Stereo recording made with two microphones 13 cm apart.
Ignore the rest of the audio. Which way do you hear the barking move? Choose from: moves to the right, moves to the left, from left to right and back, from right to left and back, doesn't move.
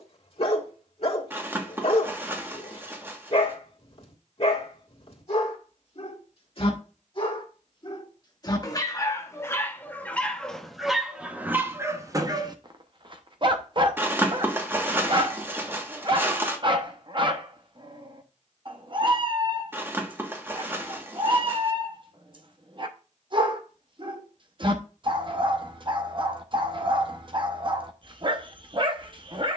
moves to the right.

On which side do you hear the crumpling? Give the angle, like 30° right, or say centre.
20° right.